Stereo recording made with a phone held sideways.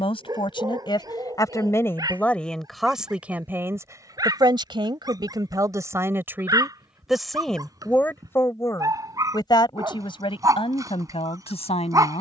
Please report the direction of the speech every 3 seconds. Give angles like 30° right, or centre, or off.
20° left, 20° right, centre, 40° left.